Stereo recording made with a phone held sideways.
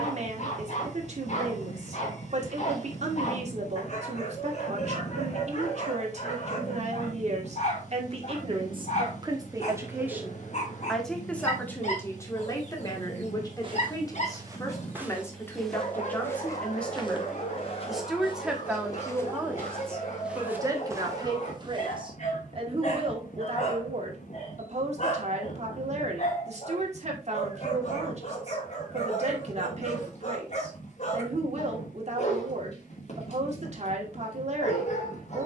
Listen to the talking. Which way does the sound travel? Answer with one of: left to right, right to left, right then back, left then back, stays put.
left then back.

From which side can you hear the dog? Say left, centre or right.
left.